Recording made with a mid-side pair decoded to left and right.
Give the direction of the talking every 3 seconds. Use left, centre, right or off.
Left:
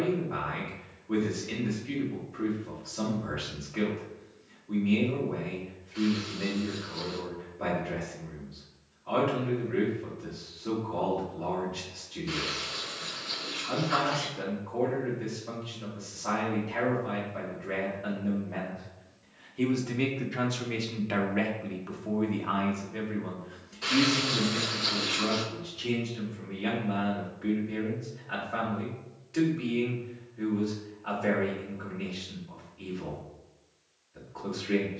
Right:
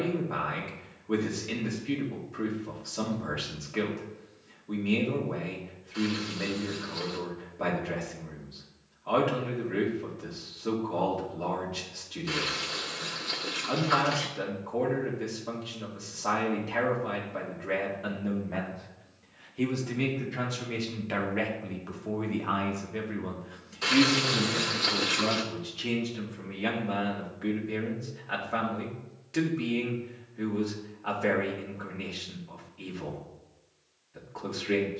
right, right, right, right, right, right, centre, centre, right, right, right, right.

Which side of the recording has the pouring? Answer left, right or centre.
right.